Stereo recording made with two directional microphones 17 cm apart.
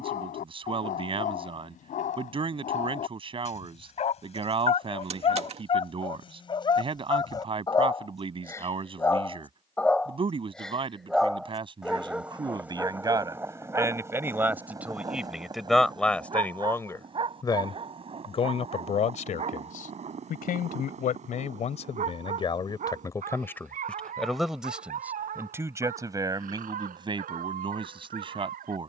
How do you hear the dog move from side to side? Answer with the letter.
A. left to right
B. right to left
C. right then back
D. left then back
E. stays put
A.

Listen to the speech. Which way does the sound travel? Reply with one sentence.
You can hear the speech go left and come back.